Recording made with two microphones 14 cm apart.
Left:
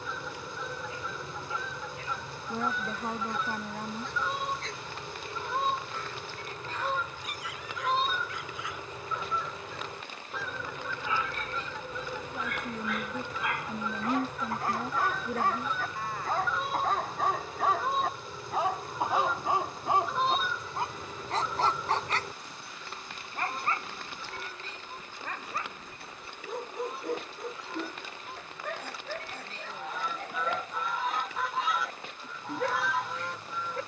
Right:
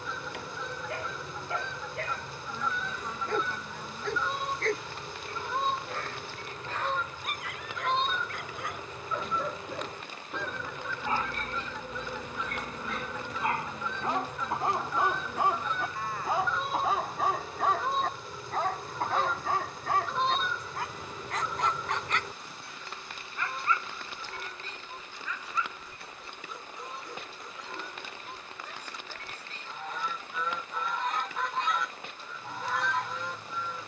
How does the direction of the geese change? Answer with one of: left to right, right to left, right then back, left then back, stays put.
stays put.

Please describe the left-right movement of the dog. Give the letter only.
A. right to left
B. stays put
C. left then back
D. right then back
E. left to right
A.